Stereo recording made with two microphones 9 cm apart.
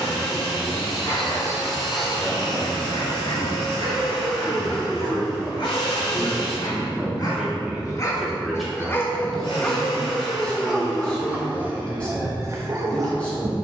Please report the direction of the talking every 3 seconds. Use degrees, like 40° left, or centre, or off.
10° left, centre, 10° right, 10° left, 10° left.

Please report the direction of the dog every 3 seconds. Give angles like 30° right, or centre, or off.
70° left, 60° left, 40° left, centre, 40° right.